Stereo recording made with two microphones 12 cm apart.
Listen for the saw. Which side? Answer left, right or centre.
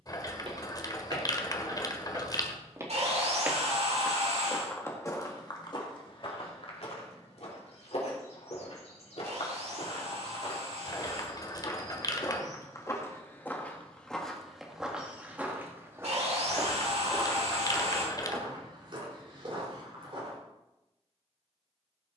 right.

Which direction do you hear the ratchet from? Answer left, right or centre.
left.